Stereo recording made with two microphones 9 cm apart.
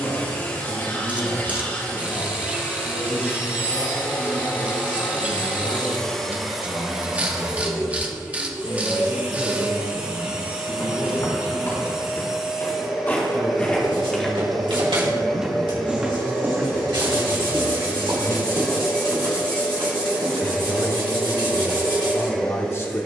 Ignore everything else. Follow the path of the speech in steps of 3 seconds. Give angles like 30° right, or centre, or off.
70° left, 70° left, 70° left, 70° left, 70° left, 70° left, 50° left, 30° left.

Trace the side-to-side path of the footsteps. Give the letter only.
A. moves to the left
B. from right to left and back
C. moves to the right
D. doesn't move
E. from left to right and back
C.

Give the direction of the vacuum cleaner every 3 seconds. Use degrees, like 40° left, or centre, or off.
20° left, 20° left, 10° right, 20° right, centre, 10° left, 10° left, 10° left.